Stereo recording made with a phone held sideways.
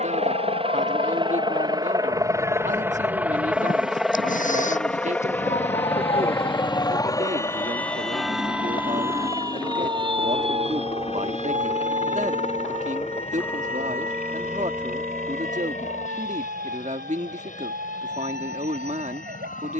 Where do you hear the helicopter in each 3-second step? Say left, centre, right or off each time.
right, centre, left, left, left, left, left.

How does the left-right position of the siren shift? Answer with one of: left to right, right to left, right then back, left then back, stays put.
left to right.